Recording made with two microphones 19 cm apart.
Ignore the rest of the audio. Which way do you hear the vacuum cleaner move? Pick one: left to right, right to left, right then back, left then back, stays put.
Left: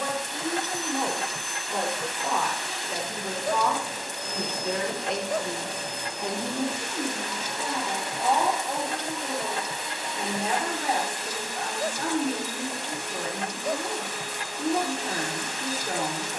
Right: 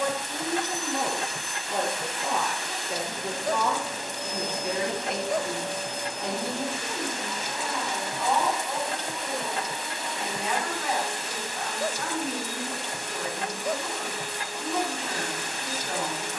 stays put.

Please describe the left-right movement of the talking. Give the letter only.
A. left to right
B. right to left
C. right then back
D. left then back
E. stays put
B.